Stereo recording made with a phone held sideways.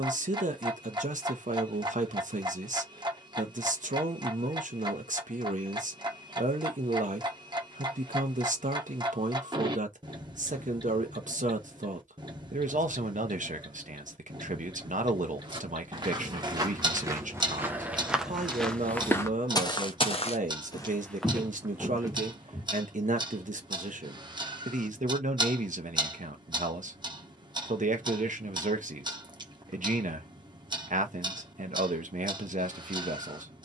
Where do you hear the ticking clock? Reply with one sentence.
You can hear the ticking clock on the right.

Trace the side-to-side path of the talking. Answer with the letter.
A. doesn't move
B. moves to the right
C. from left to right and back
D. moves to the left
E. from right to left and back
A.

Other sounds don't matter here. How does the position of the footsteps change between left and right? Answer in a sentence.
In this clip you hear the footsteps go left and come back.